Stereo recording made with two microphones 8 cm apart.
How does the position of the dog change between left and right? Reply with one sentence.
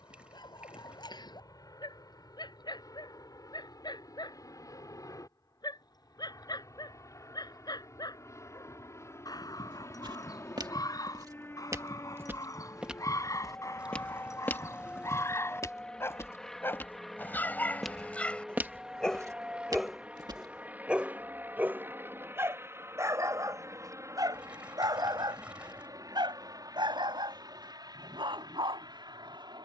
In this clip you hear the dog go from the left side to the right.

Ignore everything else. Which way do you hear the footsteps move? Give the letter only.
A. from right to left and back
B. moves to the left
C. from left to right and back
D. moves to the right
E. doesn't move
A.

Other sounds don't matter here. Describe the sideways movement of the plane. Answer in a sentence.
You can hear the plane travel towards the right.